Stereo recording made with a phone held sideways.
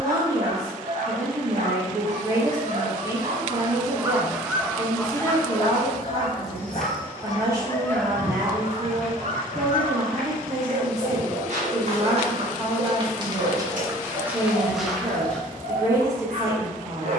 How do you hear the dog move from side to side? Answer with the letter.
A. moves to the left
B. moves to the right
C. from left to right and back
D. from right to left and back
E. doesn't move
D.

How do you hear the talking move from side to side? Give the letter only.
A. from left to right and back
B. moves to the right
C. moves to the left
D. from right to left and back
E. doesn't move
E.